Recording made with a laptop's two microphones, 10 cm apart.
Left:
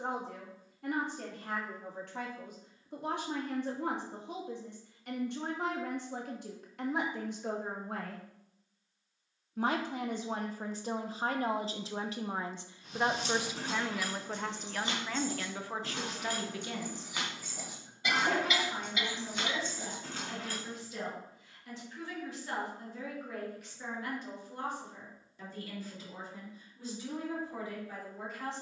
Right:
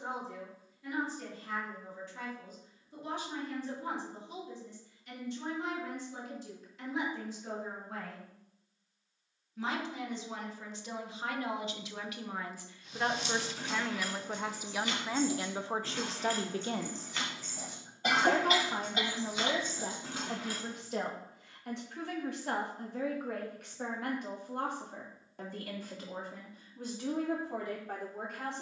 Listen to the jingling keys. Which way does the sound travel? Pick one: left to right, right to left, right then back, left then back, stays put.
left to right.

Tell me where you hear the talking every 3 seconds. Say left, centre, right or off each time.
left, left, left, left, centre, right, right, right, right, right.